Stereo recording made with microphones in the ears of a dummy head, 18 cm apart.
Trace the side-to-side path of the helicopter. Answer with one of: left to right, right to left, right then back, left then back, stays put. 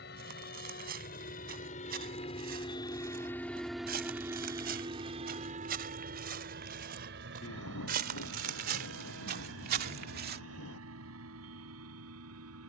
left to right.